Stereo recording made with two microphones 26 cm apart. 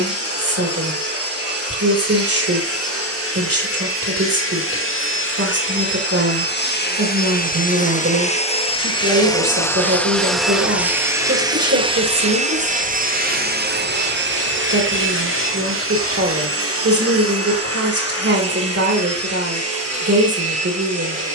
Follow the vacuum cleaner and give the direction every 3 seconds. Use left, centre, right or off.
left, left, left, centre, right, right, right.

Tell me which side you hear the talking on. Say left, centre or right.
right.